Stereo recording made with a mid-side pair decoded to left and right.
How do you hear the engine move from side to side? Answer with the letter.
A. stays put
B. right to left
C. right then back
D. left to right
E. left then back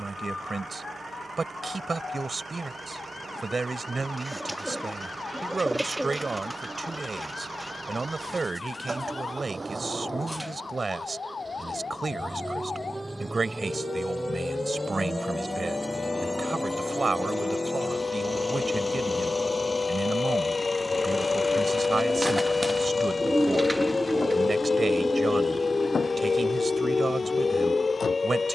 B.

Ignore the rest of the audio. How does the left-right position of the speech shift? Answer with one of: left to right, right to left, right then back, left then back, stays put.
stays put.